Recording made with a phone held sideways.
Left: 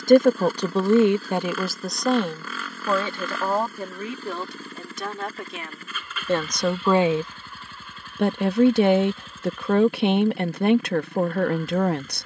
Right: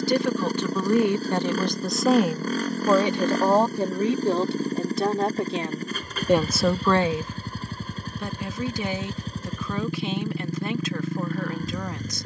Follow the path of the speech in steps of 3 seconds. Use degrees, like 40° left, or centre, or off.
20° left, 30° right, 30° left, 60° left.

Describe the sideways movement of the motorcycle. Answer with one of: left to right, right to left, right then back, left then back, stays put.
stays put.